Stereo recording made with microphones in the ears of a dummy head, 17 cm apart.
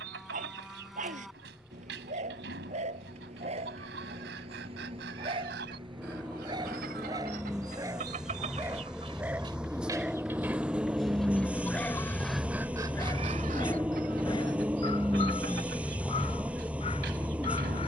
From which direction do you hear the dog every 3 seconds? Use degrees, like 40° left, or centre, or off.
40° right, 30° right, 20° right, centre, 20° left, 30° left.